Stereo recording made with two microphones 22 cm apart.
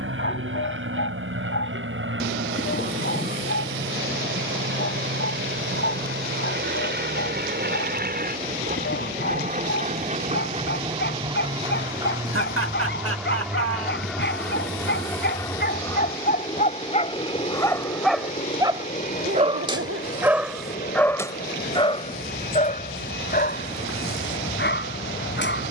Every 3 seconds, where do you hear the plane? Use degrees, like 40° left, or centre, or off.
70° right, 60° right, 50° right, 30° right, centre, 20° left, 30° left, 40° left, 50° left.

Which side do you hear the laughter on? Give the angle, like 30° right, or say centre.
70° right.